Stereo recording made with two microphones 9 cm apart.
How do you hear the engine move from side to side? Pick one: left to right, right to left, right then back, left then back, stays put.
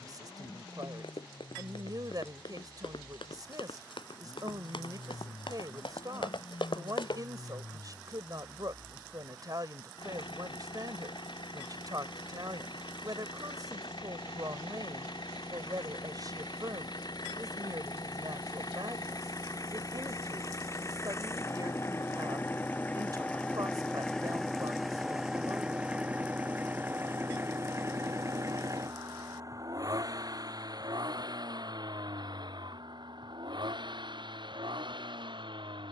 left to right.